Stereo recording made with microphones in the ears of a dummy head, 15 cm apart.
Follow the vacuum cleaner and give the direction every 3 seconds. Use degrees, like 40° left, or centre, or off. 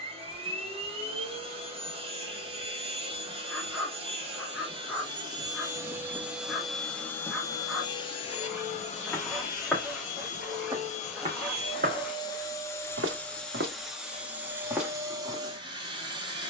30° right, 30° right, 20° left, 40° left, centre, 20° right.